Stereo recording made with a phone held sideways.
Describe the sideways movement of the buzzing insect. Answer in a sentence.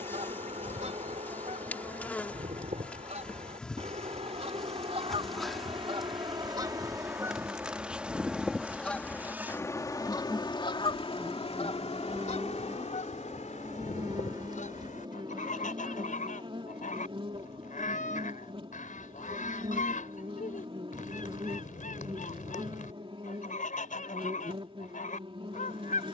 In this clip you hear the buzzing insect go from the left side to the right.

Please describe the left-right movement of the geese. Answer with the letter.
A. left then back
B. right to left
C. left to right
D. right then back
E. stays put
B.